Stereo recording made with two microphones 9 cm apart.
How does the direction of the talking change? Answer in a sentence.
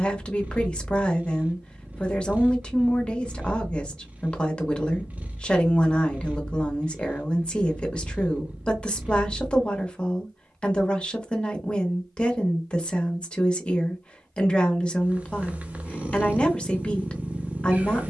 You can hear the talking stay put.